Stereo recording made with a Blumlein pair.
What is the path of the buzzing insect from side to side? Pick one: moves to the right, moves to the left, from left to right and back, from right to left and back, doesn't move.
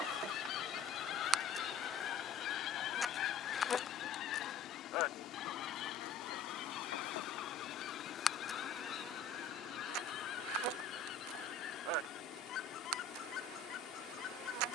from right to left and back.